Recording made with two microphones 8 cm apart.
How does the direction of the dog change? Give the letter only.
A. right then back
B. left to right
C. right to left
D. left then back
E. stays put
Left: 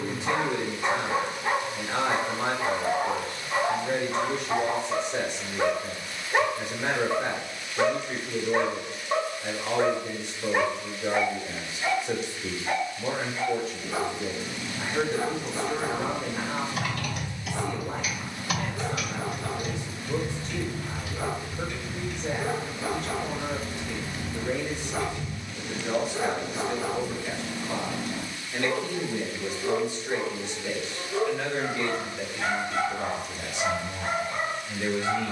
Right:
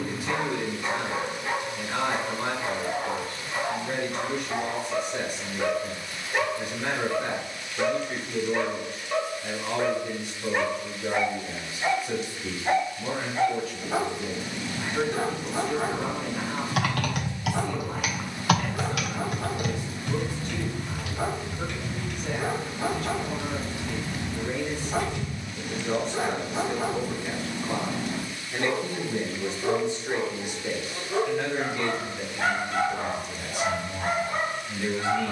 B.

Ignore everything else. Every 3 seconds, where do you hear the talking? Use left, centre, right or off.
left, left, left, left, left, left, left, left, centre, right, centre, left.